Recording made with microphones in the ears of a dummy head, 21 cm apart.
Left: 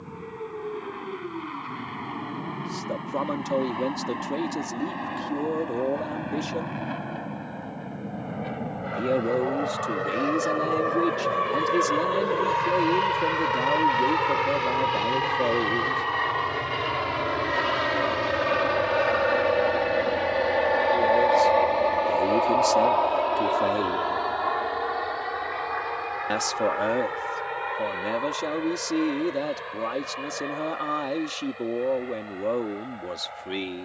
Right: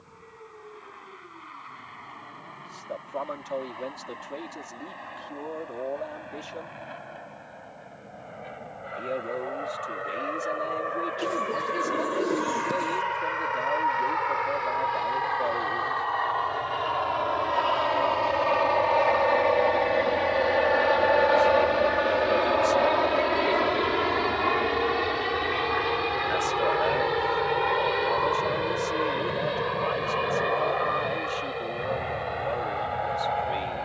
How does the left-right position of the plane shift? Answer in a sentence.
In this clip you hear the plane go from the left side to the right.